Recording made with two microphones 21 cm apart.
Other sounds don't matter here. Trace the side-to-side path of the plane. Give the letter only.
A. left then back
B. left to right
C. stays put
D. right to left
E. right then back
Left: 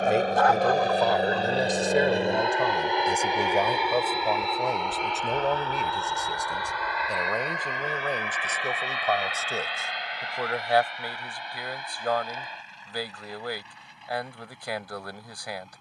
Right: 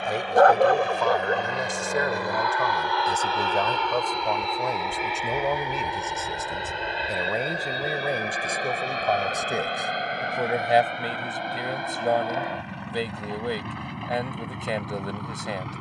B.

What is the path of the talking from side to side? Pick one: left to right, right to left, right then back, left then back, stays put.
left to right.